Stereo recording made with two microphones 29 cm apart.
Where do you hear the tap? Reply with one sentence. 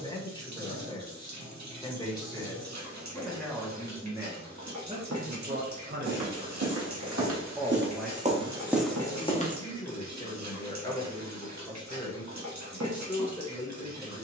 You can hear the tap on the right.